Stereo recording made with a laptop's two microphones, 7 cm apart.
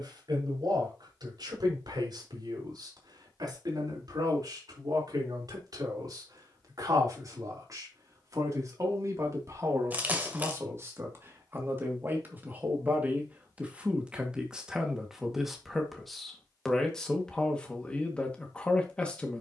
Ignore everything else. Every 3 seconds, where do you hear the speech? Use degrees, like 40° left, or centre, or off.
60° right, 60° right, 50° right, 40° right, 20° right, centre, 10° left.